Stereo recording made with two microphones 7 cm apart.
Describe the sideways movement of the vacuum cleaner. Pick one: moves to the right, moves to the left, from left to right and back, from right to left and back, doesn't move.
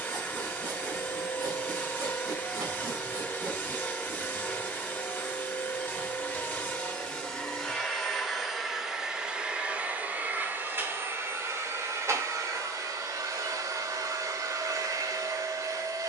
moves to the right.